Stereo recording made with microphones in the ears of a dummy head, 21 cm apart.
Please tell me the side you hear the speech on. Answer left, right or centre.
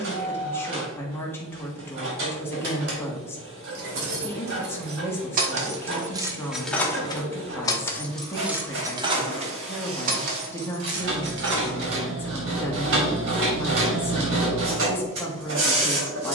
centre.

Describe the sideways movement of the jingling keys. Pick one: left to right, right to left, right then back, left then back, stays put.
left then back.